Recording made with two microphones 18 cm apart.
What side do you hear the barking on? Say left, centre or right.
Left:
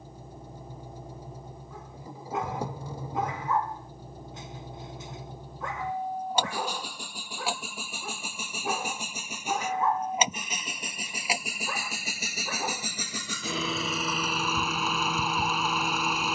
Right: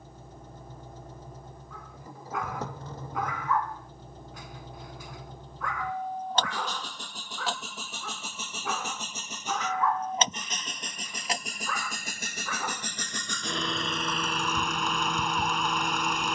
left.